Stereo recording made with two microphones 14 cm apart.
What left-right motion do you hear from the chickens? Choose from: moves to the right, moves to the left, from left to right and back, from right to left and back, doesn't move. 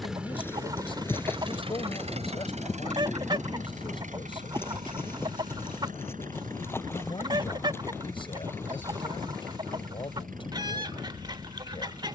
doesn't move.